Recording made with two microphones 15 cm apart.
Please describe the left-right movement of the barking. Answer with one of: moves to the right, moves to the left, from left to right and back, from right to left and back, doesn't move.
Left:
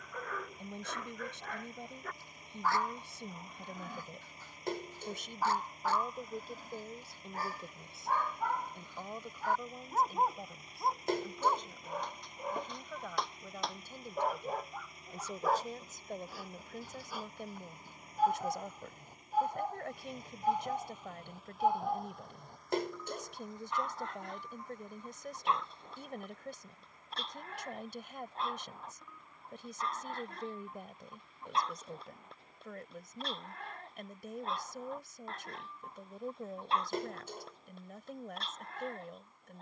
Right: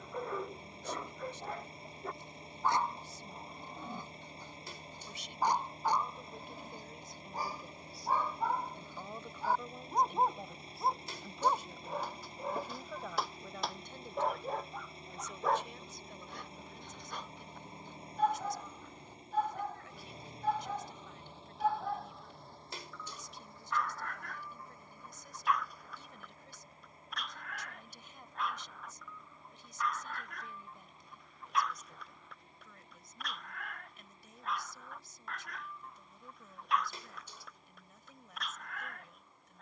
moves to the left.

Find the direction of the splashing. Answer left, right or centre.
left.